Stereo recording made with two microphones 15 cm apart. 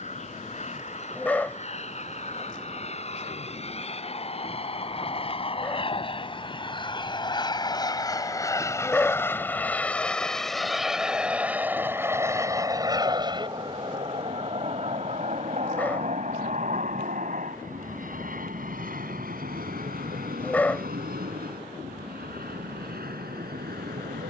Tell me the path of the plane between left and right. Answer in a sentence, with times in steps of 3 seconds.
You can hear the plane on the left from 0 s, in the centre from 9 s and on the right from 12 s.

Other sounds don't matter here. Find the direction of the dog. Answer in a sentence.
In this clip you hear the dog in the centre.